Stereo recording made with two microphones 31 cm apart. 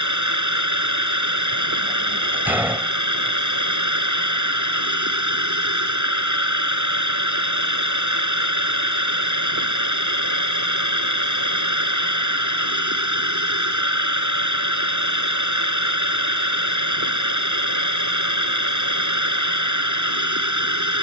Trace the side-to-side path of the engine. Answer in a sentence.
In this clip you hear the engine stay put.